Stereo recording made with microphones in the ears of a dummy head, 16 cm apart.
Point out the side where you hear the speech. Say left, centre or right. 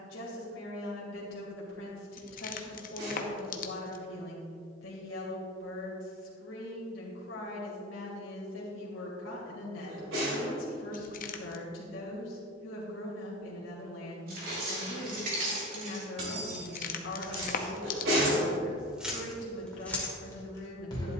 left.